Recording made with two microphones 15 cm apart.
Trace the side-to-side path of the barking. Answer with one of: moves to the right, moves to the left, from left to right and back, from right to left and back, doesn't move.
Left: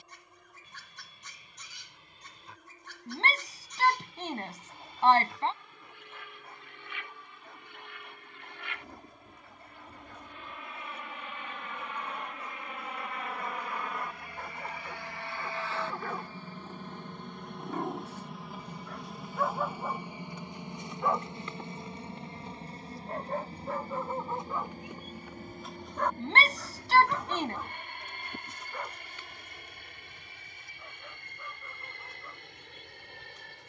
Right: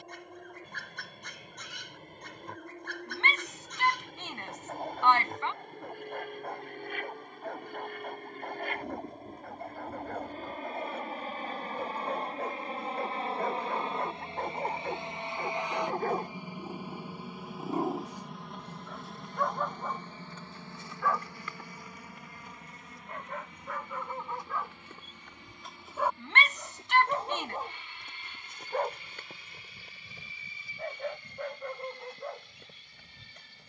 from right to left and back.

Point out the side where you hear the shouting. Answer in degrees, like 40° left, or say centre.
40° left.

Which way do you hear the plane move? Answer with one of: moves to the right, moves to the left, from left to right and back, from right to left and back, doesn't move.
moves to the left.